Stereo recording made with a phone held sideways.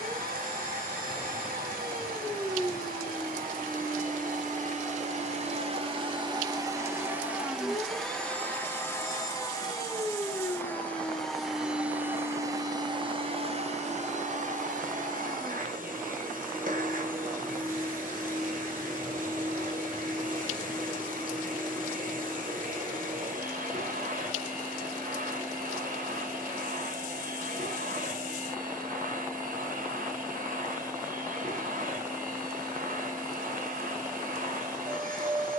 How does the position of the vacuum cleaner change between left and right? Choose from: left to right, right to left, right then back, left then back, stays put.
left then back.